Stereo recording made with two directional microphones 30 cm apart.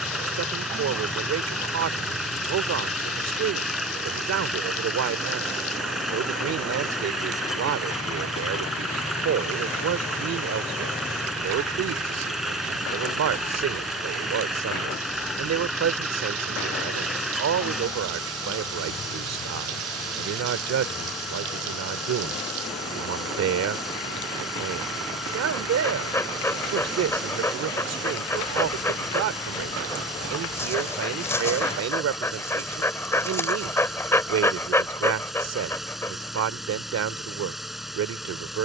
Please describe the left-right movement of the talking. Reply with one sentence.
In this clip you hear the talking stay put.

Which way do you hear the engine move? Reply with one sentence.
You can hear the engine stay put.